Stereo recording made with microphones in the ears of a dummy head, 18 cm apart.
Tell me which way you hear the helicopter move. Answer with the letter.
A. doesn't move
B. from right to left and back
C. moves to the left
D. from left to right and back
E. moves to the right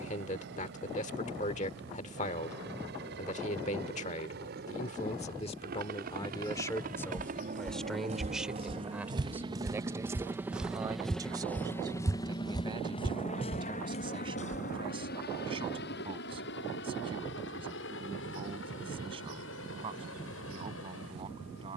C.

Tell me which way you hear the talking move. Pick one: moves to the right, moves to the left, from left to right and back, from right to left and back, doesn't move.
moves to the right.